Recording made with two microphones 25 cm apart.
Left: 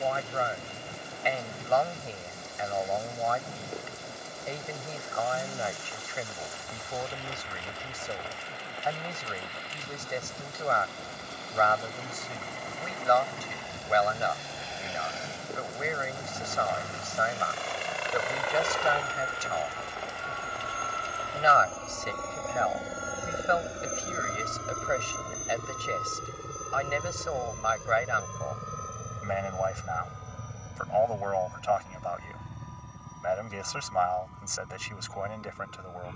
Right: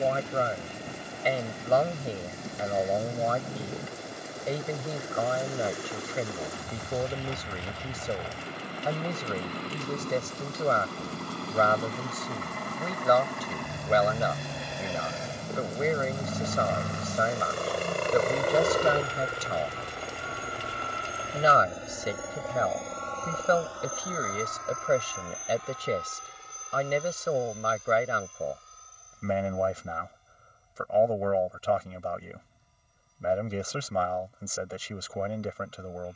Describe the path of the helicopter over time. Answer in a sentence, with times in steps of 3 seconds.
In this clip you hear the helicopter on the right from 0 s, in the centre from 21 s and on the left from 24 s.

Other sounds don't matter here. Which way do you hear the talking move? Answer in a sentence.
In this clip you hear the talking stay in one place.